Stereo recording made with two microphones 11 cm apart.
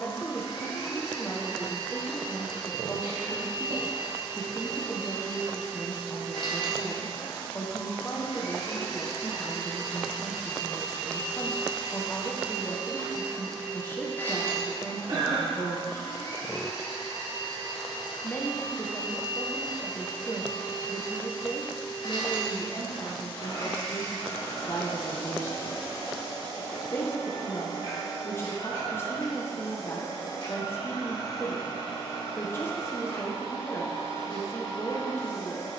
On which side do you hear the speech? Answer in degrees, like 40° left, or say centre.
20° left.